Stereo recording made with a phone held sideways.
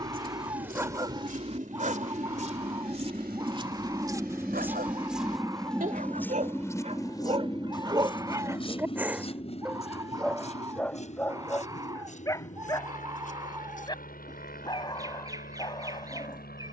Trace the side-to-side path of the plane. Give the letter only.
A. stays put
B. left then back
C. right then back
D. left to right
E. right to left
E.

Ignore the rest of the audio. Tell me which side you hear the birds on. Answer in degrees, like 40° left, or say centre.
20° right.